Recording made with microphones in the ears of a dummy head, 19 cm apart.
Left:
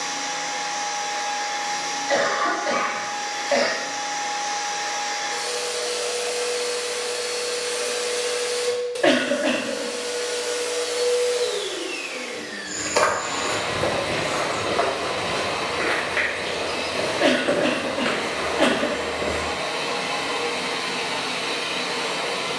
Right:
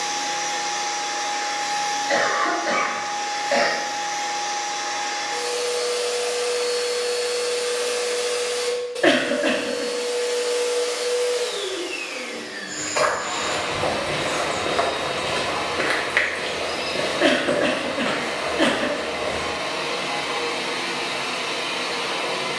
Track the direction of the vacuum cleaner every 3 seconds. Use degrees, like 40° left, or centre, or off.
20° right, 20° left, 30° left, 30° left, 30° left, 30° left, 30° left, 30° left.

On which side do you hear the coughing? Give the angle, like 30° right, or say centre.
10° right.